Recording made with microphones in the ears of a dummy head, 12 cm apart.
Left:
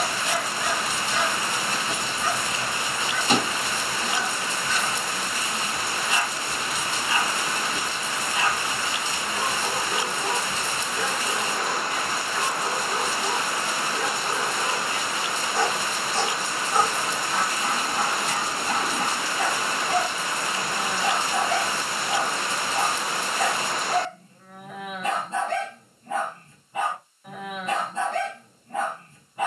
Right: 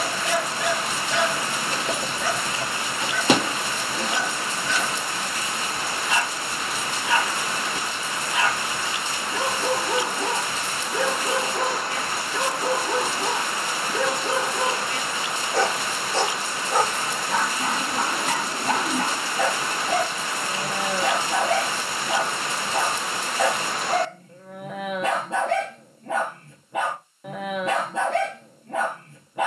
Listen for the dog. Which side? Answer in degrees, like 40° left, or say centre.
50° right.